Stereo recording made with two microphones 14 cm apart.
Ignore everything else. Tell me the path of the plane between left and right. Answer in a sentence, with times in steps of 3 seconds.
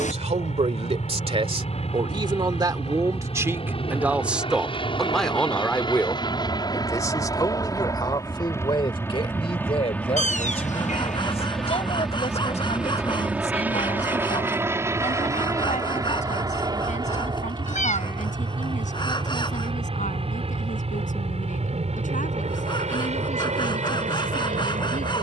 In this clip you hear the plane on the left from 0 s, in the centre from 9 s and on the right from 15 s.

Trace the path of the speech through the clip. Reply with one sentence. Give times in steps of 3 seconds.
You can hear the speech on the right from 0 s, in the centre from 3 s and on the left from 6 s.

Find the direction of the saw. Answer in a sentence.
You can hear the saw on the left.